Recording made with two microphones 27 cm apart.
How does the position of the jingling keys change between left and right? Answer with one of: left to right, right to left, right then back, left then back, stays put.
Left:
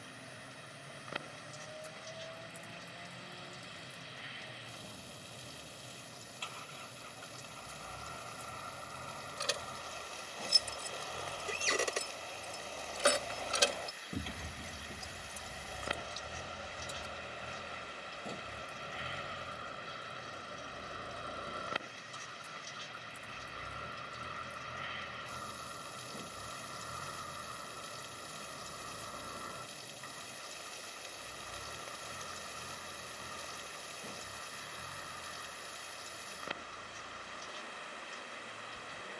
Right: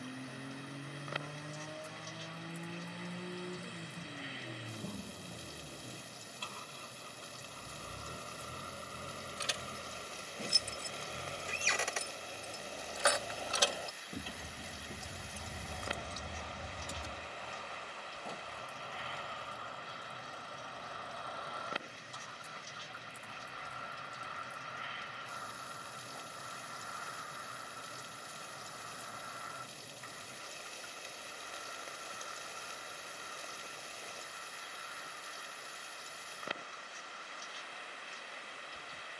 left to right.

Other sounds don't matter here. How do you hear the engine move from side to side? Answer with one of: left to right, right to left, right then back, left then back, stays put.
right to left.